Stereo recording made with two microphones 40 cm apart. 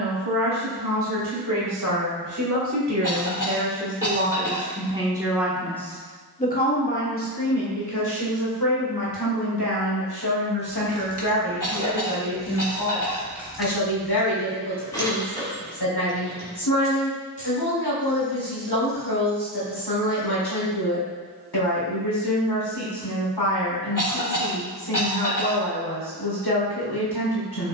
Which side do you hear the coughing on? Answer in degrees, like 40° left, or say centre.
50° left.